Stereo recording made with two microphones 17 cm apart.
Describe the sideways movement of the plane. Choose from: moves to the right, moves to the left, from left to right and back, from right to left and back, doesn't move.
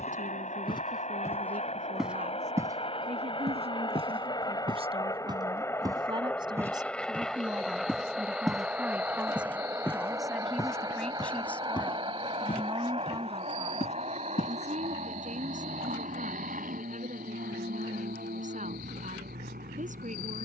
moves to the right.